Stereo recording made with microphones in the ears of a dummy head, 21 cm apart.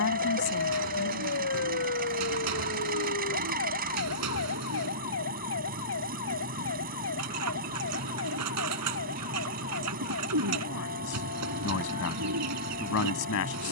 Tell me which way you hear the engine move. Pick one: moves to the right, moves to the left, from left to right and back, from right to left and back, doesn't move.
doesn't move.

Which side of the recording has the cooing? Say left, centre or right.
right.